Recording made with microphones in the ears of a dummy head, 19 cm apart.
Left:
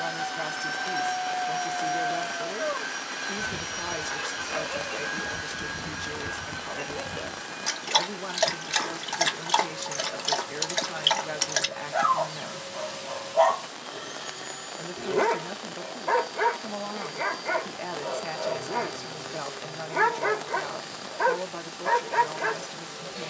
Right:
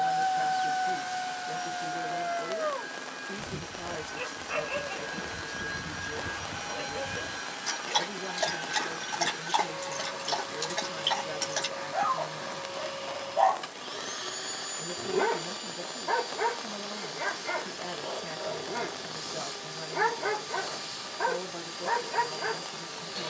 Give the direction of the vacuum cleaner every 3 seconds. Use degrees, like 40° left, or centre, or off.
60° left, 30° left, 20° right, 40° right, 40° right, 40° right, 40° right, 40° right.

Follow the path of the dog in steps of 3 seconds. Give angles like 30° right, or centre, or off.
40° right, 20° right, 20° left, 30° left, 30° left, 30° left, 30° left, 30° left.